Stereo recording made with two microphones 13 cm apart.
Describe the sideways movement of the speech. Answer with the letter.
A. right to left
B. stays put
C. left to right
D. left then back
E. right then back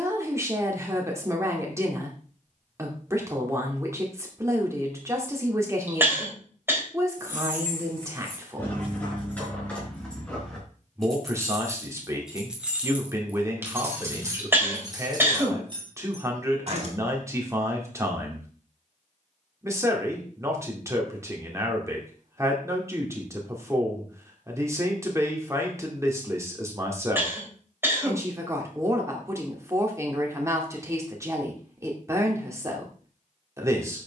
B.